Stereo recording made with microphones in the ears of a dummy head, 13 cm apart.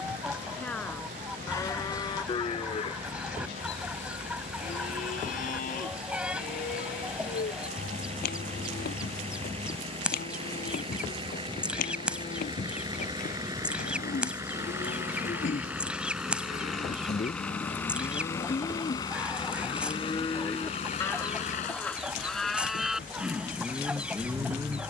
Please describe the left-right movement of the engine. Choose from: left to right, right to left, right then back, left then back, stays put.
right to left.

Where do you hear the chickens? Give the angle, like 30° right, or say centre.
10° right.